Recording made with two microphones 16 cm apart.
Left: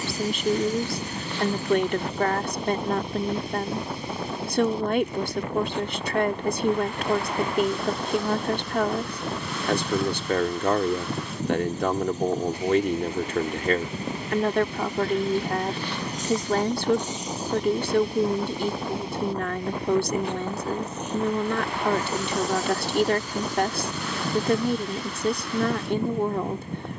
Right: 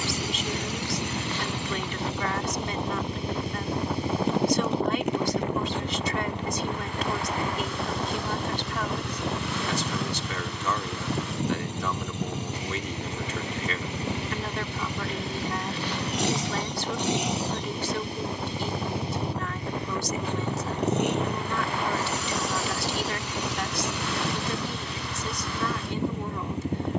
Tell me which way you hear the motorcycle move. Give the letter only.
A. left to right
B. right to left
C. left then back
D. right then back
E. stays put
E.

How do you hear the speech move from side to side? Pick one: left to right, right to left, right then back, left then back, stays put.
stays put.